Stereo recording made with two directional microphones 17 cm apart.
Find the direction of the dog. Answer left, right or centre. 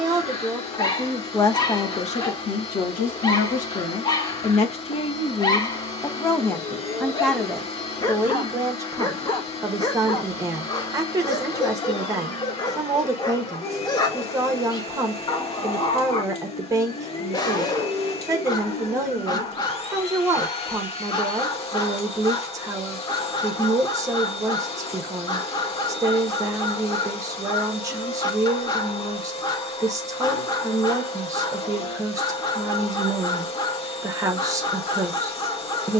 left.